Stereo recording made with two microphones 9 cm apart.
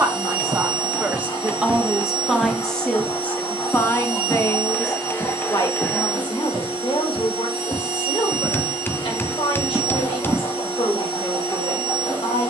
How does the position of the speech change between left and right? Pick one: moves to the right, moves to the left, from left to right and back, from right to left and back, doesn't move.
moves to the left.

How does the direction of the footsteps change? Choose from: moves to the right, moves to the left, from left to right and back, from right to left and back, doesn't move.
from right to left and back.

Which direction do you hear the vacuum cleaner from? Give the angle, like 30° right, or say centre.
80° left.